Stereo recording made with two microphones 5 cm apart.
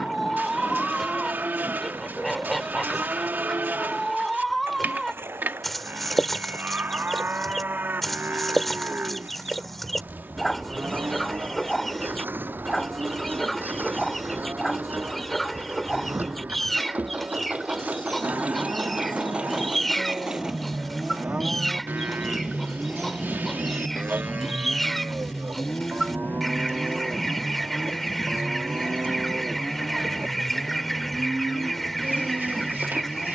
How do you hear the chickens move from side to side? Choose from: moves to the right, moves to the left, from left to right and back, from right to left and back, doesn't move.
doesn't move.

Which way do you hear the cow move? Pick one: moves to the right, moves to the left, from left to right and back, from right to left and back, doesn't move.
doesn't move.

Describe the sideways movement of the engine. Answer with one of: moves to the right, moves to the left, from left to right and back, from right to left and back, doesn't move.
moves to the left.